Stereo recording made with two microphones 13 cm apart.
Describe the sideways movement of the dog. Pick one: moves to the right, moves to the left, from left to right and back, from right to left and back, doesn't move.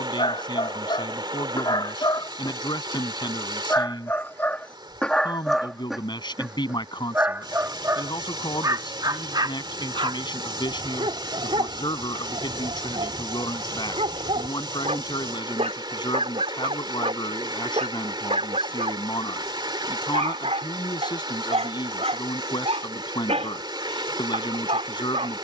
moves to the right.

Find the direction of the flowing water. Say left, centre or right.
right.